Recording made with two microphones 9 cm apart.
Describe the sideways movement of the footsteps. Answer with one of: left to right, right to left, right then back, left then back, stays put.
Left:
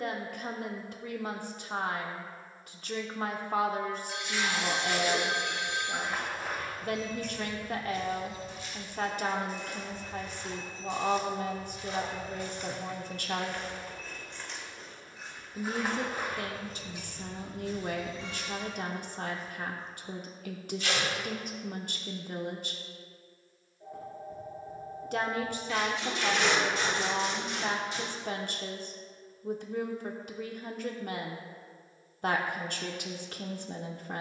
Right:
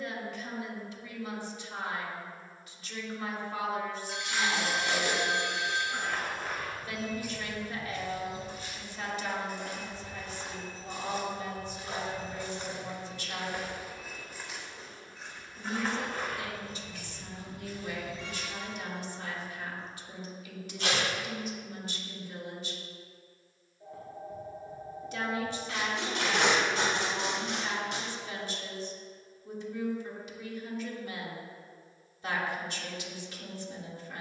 right then back.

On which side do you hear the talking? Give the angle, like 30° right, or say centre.
50° left.